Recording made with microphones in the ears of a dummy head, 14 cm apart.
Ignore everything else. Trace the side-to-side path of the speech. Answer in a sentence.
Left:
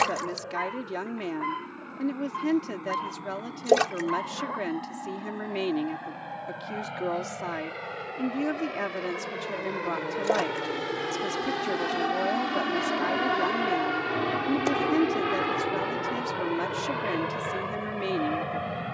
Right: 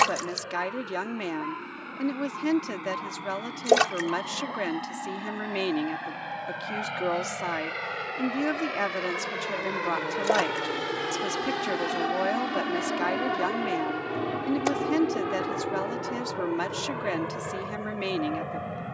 You can hear the speech stay in one place.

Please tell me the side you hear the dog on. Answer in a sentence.
You can hear the dog on the left.